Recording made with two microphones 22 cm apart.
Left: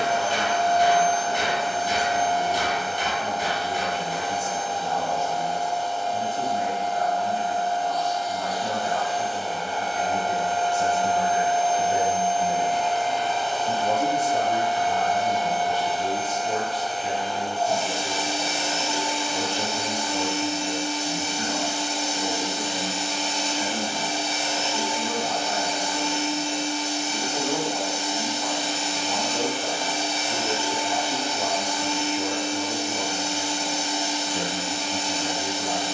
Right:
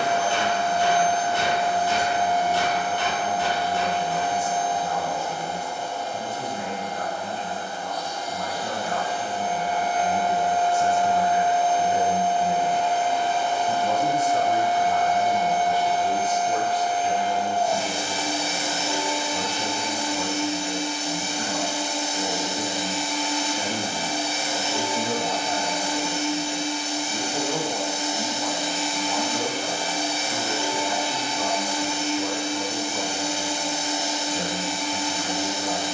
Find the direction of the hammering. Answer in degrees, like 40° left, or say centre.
20° left.